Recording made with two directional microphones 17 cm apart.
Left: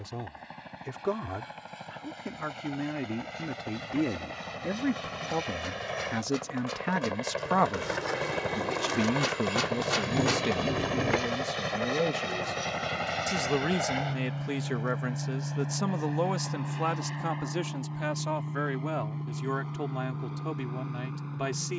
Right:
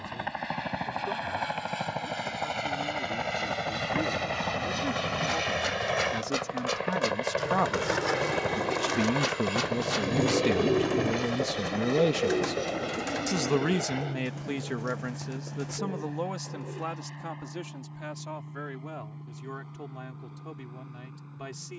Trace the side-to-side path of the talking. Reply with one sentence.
You can hear the talking move from left to right and back again.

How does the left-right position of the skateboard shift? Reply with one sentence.
You can hear the skateboard move to the left.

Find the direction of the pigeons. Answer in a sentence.
In this clip you hear the pigeons on the right.